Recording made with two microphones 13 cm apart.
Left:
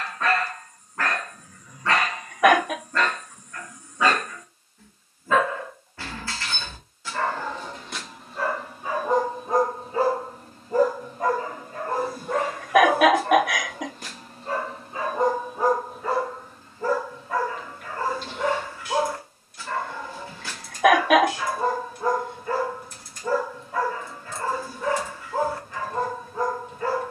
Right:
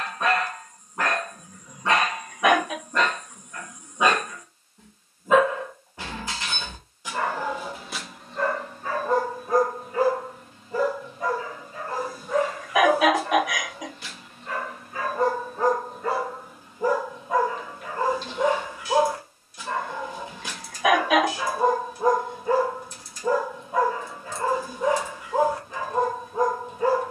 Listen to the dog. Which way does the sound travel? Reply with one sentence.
You can hear the dog go left and come back.